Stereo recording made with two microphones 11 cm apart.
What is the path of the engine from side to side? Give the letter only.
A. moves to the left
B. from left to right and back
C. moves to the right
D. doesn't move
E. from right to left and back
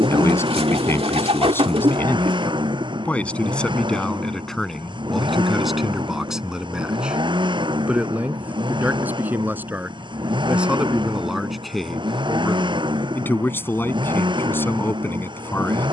D.